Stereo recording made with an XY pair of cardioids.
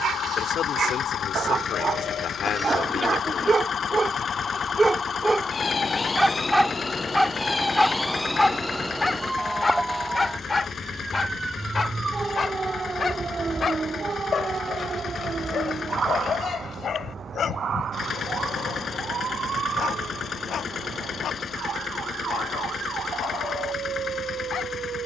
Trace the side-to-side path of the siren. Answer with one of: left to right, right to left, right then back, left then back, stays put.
left to right.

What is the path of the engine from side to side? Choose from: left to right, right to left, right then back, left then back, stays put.
stays put.